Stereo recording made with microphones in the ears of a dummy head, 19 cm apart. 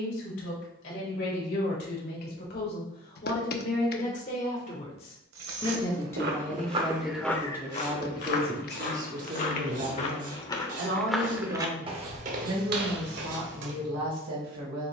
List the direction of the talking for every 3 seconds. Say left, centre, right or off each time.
left, left, centre, right, right.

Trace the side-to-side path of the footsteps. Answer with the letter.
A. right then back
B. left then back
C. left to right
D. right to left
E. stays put
B.